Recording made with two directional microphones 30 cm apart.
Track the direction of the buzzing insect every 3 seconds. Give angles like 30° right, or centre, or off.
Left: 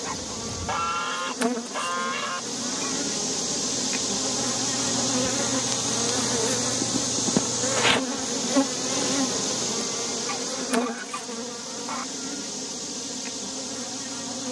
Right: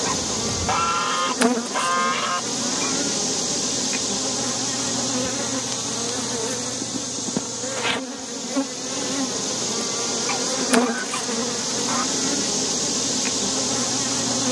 30° right, centre, 20° left, 20° right, 50° right.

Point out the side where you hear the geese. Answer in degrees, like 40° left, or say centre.
30° right.